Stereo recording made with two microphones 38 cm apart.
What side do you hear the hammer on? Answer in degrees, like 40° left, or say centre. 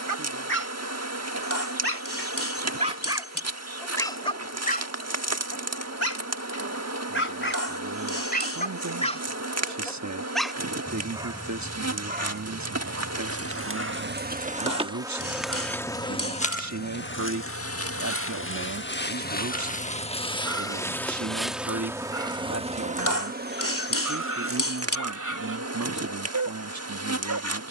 50° left.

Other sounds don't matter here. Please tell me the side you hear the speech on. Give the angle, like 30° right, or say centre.
50° right.